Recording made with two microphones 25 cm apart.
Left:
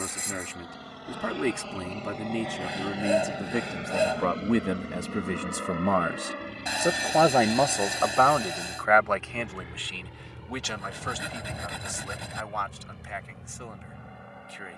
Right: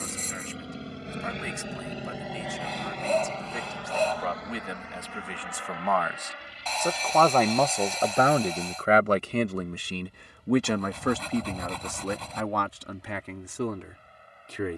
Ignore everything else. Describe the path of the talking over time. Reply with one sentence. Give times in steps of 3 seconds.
In this clip you hear the talking on the left from 0 s, in the centre from 6 s and on the right from 9 s.